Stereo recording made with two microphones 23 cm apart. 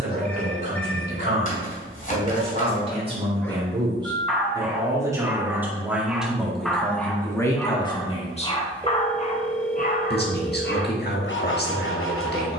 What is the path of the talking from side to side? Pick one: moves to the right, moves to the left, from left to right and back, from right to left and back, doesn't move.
moves to the left.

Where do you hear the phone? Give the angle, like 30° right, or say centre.
10° left.